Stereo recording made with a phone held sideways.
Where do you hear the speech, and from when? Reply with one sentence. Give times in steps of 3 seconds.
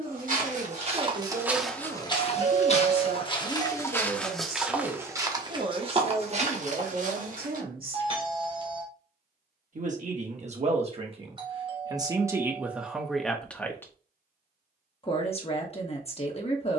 You can hear the speech on the right from 0 s, in the centre from 12 s and on the left from 15 s.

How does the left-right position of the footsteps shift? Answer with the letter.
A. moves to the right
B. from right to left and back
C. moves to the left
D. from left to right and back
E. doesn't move
B.